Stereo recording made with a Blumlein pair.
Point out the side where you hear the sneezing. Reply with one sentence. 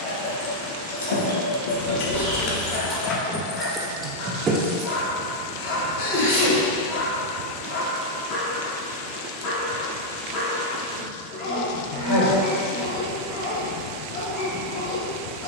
In this clip you hear the sneezing on the left.